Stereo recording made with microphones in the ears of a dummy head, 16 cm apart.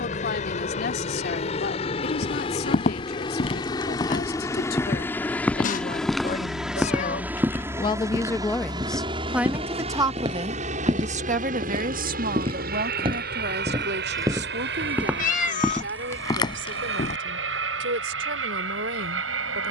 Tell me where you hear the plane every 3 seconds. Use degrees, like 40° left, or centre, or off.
40° left, 20° left, 10° right, 40° right, 50° right, 60° right, 70° right.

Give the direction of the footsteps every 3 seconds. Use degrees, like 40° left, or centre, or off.
50° left, 20° left, 10° right, 30° right, 30° right, 20° left, off.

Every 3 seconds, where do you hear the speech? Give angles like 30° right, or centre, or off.
60° left, 60° left, 30° left, 30° right, 60° right, 80° right, 80° right.